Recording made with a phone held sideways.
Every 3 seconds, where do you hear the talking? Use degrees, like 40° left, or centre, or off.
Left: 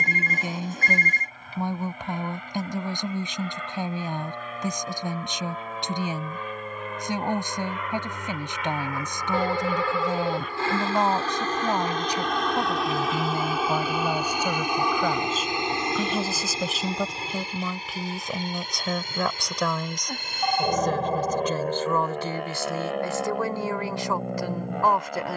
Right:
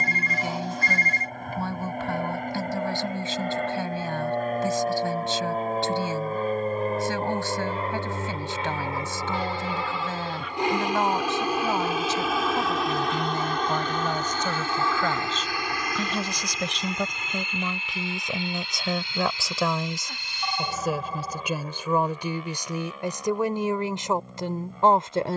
20° left, 20° left, 20° left, 20° left, 10° left, 10° left, centre, 10° right, 20° right.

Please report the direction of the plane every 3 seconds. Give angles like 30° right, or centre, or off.
60° right, 50° right, 40° right, 20° right, centre, 30° left, 40° left, 50° left, 60° left.